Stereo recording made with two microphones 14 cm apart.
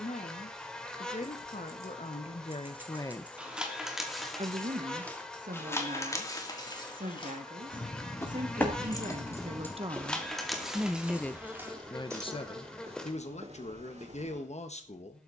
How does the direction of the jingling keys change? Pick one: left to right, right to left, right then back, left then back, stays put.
left then back.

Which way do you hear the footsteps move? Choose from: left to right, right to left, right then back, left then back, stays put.
left to right.